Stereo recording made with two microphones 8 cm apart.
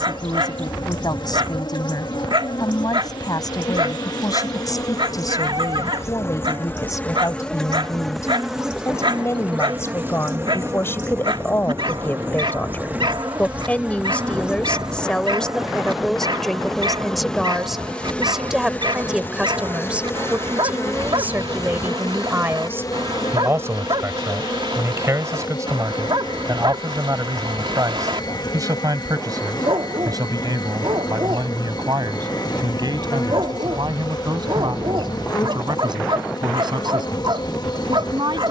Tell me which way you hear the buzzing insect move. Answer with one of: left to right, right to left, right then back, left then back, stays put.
right then back.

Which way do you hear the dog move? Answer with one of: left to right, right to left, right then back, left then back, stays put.
stays put.